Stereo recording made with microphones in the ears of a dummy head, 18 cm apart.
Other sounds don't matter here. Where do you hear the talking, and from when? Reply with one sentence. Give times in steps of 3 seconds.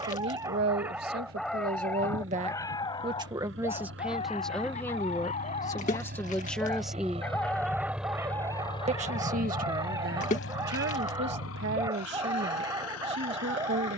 In this clip you hear the talking on the right from 0 s, in the centre from 3 s and on the right from 9 s.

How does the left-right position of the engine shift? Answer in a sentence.
You can hear the engine travel towards the left.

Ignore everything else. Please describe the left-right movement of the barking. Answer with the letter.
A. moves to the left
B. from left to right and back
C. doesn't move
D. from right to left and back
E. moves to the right
D.